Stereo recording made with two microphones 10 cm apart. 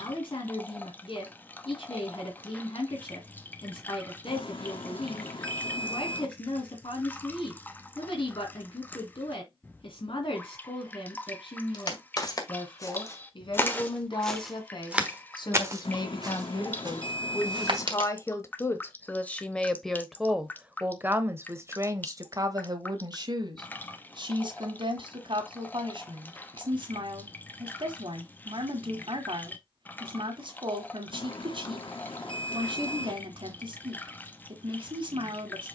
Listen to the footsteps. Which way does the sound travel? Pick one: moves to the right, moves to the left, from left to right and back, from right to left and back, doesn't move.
moves to the right.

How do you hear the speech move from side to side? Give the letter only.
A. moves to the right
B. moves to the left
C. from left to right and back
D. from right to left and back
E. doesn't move
A.